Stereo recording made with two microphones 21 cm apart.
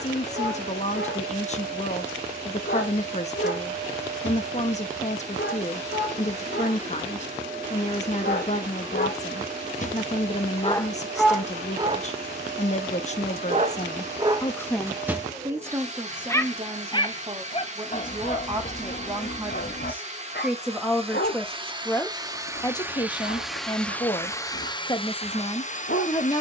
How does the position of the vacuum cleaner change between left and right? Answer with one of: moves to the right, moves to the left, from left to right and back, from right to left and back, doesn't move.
moves to the left.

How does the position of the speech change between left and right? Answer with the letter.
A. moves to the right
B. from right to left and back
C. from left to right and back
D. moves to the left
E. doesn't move
C.